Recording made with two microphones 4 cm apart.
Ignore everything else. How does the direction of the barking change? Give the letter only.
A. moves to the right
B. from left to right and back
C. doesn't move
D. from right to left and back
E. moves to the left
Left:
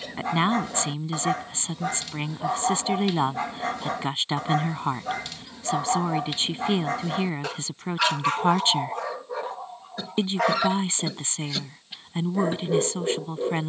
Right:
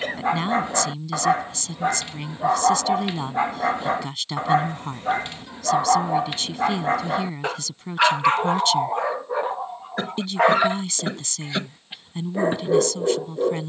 C.